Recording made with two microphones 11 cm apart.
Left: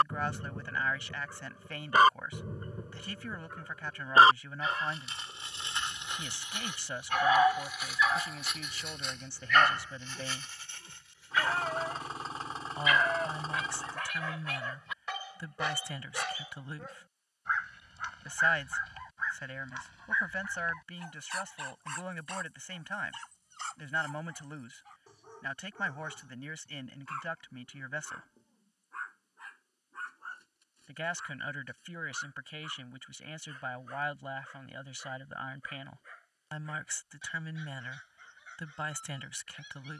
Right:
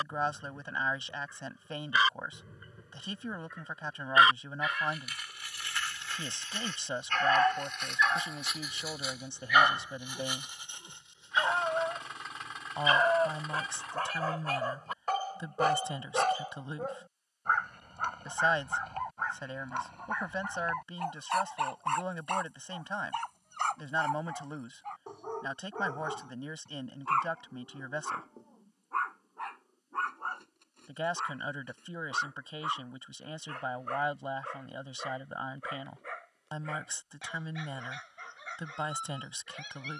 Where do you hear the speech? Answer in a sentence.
In this clip you hear the speech on the right.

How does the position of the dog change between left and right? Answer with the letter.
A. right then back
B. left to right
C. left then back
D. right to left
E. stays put
B.